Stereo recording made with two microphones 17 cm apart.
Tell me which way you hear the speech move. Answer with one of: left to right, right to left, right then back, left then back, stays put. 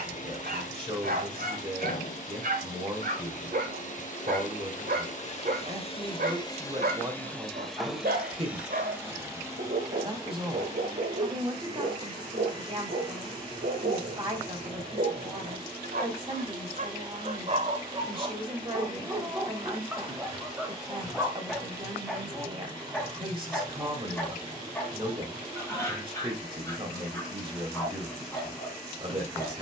stays put.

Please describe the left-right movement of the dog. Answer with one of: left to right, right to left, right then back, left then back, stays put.
right to left.